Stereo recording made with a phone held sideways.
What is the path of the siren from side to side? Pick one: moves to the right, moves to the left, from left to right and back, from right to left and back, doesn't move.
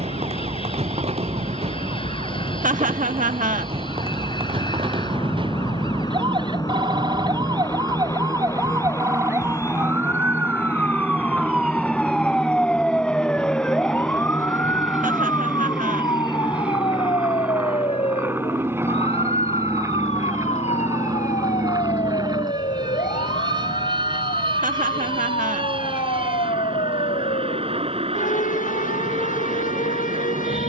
moves to the left.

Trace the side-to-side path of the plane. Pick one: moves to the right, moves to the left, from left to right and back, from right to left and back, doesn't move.
moves to the right.